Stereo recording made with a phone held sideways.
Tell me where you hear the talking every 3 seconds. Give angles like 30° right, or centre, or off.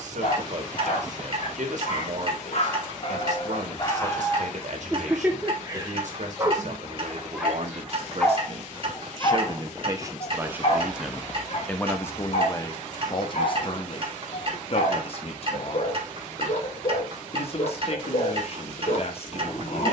60° right, 60° right, 60° right, 20° right, 40° left, 50° left, 50° left.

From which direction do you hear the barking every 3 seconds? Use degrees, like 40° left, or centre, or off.
50° left, 10° left, centre, 40° left, 50° left, 50° left, 50° left.